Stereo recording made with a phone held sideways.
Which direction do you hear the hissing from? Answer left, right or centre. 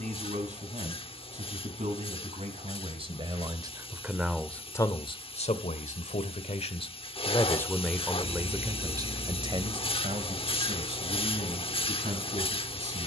left.